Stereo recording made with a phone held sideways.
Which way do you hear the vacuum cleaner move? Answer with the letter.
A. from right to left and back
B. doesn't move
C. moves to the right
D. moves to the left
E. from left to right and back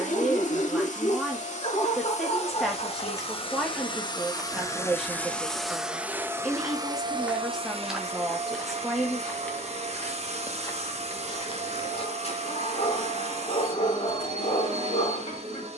C.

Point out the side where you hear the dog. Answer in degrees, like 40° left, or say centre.
50° left.